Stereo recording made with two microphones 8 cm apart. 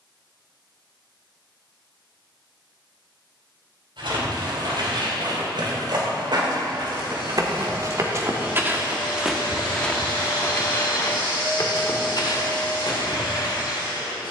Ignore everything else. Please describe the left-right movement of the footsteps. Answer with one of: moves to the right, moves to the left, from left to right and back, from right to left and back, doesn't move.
moves to the left.